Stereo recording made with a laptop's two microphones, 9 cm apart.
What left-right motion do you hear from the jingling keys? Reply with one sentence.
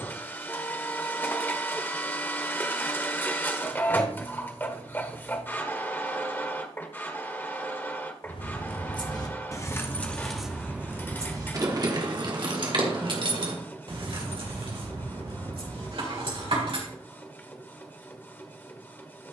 In this clip you hear the jingling keys move from left to right.